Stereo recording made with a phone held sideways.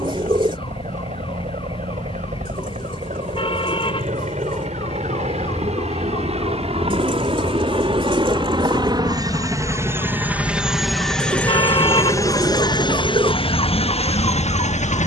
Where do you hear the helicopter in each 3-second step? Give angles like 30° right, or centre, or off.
70° right, 60° right, 40° right, 10° right, 40° left.